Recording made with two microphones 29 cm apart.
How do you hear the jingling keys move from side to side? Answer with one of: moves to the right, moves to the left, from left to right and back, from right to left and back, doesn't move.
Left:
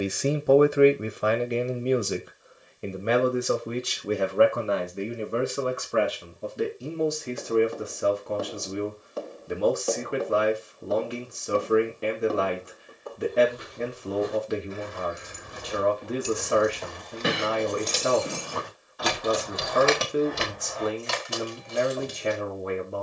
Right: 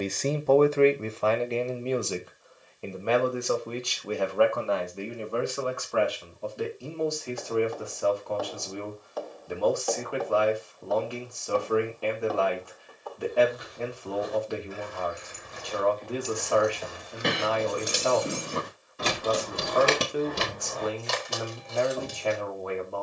moves to the right.